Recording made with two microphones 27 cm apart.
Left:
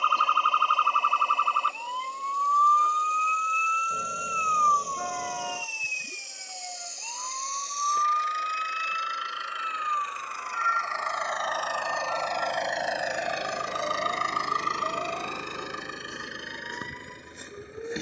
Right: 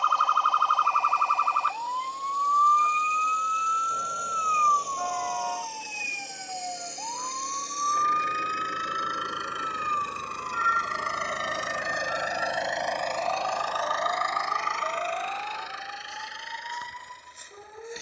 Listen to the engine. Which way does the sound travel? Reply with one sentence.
In this clip you hear the engine travel towards the left.